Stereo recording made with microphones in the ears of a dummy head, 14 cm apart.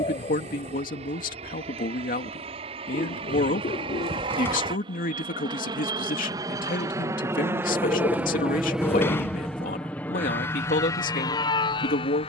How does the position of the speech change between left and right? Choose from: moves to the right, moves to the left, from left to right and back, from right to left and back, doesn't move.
doesn't move.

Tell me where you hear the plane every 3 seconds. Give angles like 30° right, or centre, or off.
40° right, 30° right, 20° right, 20° left.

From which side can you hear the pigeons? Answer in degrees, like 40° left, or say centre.
40° left.